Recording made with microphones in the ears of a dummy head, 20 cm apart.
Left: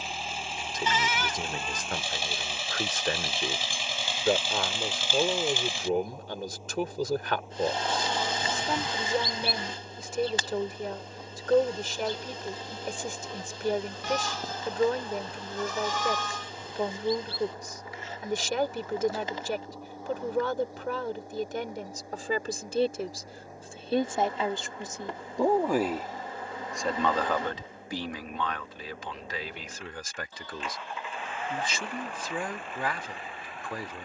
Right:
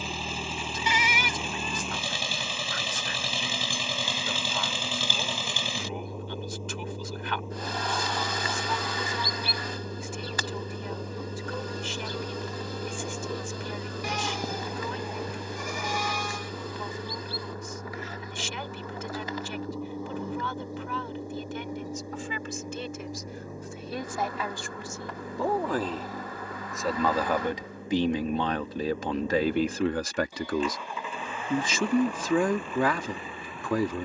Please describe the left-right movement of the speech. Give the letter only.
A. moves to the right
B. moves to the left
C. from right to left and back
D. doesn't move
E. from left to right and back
A.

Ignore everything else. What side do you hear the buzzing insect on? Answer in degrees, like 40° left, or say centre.
20° left.